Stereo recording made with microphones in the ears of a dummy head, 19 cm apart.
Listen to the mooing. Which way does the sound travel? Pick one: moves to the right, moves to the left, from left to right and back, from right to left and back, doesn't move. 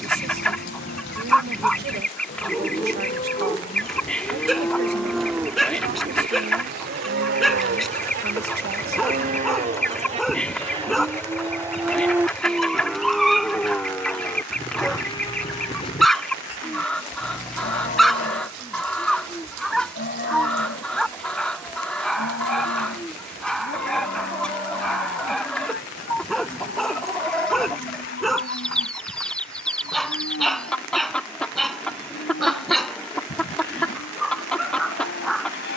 from left to right and back.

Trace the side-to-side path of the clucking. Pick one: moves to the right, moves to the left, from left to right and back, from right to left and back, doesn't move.
doesn't move.